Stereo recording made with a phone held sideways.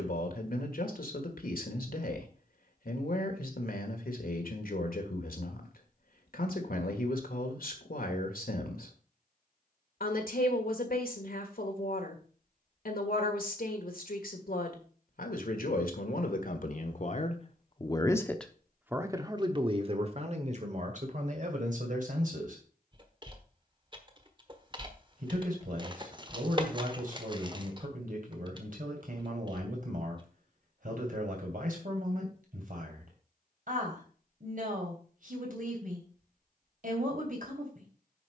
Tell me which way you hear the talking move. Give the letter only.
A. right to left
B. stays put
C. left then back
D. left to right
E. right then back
D.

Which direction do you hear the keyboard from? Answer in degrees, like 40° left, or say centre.
30° right.